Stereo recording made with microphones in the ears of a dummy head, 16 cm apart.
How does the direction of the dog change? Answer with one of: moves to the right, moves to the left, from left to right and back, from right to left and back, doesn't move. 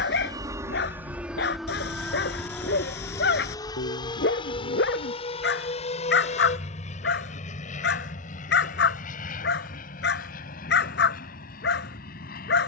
doesn't move.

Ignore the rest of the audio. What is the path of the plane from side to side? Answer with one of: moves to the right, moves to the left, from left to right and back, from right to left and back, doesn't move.
moves to the left.